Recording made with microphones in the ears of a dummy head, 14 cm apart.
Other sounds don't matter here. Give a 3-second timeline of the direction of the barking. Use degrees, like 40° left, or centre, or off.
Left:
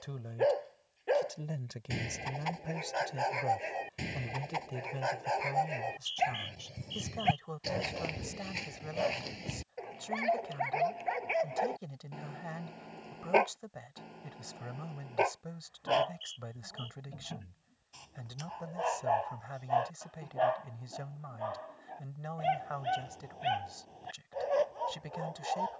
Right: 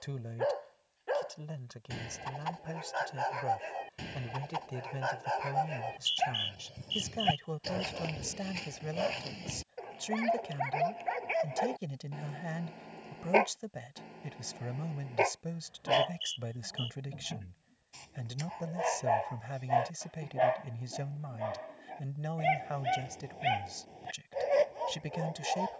20° left, 10° left, 10° left, centre, centre, 10° right, 10° right, 20° right, 20° right.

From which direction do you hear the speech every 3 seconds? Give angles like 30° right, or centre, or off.
10° left, centre, 20° right, 30° right, 30° right, 30° right, 30° right, 30° right, 30° right.